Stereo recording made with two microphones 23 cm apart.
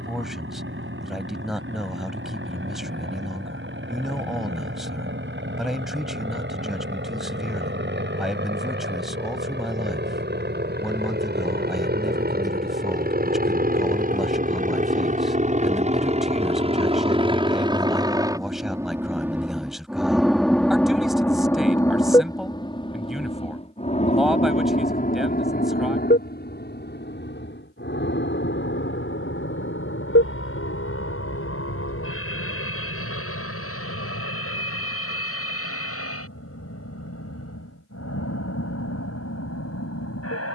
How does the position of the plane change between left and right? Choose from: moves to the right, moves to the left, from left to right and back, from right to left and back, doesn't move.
moves to the left.